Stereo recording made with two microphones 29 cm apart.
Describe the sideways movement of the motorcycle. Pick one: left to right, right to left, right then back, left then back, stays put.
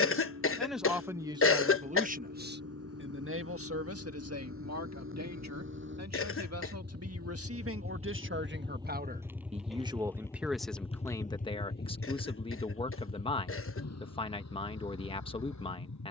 right to left.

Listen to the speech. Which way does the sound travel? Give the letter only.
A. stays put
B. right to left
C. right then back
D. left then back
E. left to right
C.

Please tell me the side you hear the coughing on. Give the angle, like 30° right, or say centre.
50° left.